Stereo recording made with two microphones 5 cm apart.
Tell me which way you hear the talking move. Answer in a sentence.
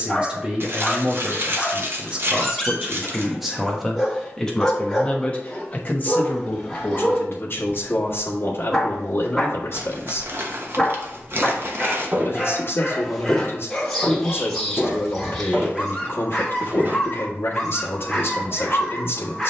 You can hear the talking travel towards the left.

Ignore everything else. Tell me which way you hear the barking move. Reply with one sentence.
In this clip you hear the barking stay in one place.